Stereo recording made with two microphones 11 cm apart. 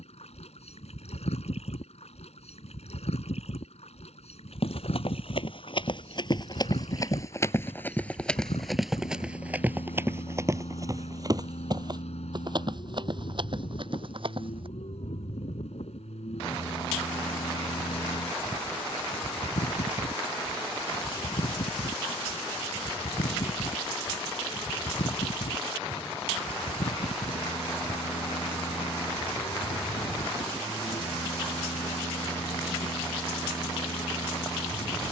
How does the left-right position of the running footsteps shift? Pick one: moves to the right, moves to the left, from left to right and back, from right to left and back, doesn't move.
moves to the right.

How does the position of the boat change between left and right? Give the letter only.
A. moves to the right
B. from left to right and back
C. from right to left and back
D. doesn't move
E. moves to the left
D.